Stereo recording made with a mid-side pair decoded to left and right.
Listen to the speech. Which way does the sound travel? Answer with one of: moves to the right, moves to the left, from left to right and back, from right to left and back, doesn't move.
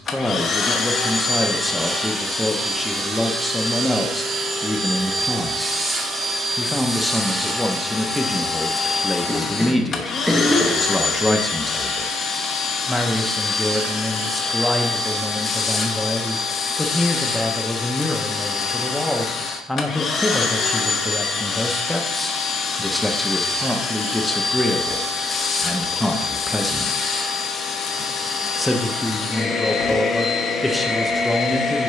doesn't move.